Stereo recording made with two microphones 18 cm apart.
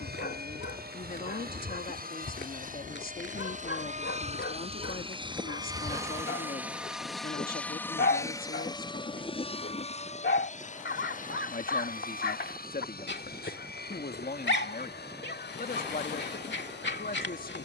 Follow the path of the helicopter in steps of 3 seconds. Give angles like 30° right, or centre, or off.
60° right, 40° right, 10° left, 40° left, 60° left, 70° left.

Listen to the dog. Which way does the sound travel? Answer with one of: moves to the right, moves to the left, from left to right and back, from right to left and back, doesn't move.
doesn't move.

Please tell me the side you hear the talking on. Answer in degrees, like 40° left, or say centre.
50° left.